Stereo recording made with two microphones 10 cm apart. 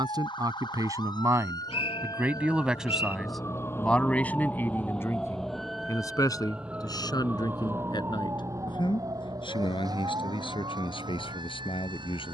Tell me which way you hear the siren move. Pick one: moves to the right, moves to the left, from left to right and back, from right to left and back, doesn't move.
moves to the right.